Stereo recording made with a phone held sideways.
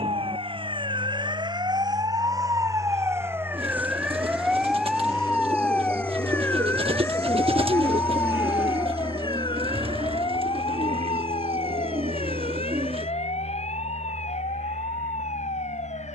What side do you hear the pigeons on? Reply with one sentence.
In this clip you hear the pigeons on the right.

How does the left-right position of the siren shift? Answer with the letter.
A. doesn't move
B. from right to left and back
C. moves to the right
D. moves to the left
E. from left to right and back
D.